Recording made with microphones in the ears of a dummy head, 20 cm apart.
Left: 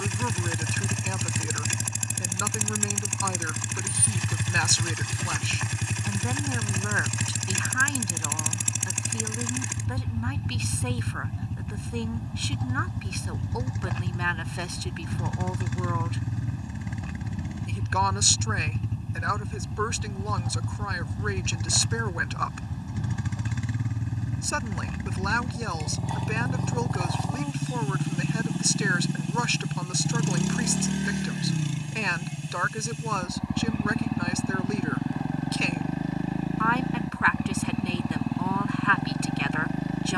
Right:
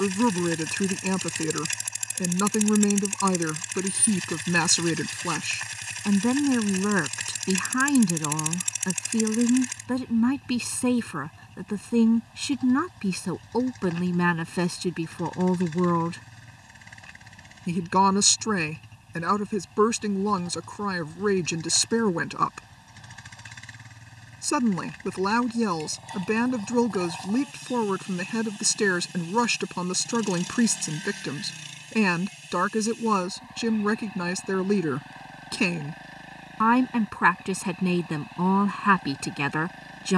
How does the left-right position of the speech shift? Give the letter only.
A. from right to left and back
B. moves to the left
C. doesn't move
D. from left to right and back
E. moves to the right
C.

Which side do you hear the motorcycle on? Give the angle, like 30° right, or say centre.
50° left.